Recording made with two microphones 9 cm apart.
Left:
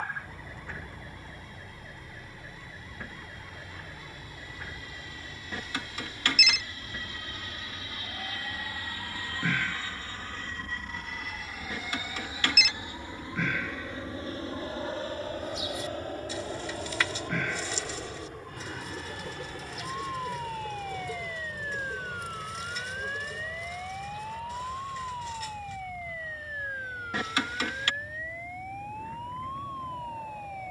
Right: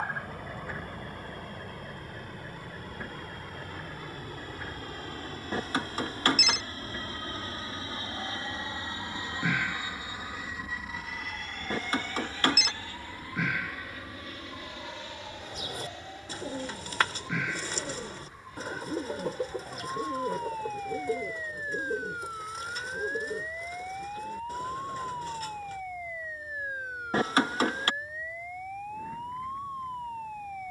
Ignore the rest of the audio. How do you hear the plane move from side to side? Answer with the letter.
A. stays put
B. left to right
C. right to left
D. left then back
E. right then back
C.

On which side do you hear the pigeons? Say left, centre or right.
right.